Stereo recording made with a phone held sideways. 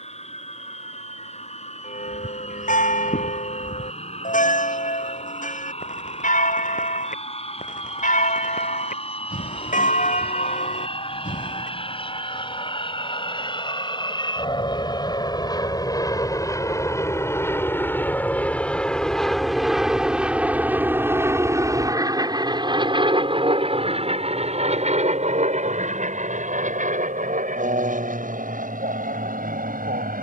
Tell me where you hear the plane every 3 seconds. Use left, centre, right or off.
left, left, left, left, left, left, centre, right, right, right.